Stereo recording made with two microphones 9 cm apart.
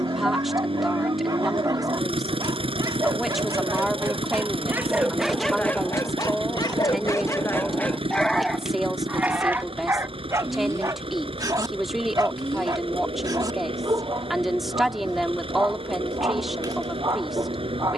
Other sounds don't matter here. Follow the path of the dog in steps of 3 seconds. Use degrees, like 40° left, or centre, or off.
40° right, 20° right, 30° left, 30° right, 40° right, 40° right.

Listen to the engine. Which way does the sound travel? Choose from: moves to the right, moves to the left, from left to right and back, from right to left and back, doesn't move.
doesn't move.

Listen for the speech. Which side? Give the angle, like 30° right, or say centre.
centre.